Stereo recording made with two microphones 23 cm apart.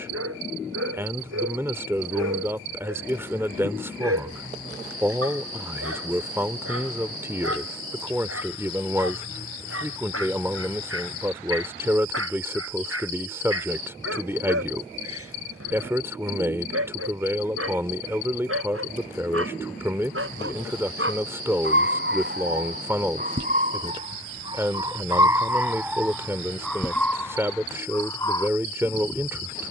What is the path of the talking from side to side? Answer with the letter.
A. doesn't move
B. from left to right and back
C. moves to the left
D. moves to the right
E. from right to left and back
A.